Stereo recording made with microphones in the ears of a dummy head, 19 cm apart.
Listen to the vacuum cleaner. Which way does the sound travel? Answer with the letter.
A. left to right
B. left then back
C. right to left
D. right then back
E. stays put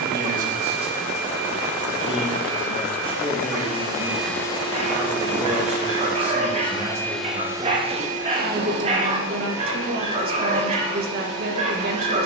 B.